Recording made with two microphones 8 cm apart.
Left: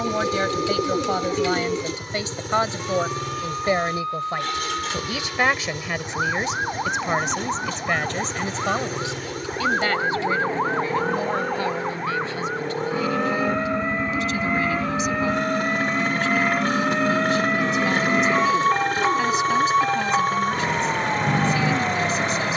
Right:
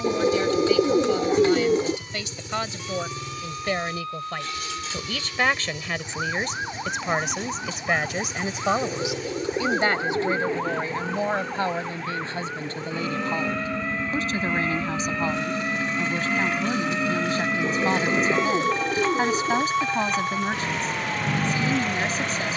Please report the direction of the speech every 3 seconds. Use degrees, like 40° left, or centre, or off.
50° left, 20° left, centre, 20° right, 40° right, 40° right, 40° right, 40° right.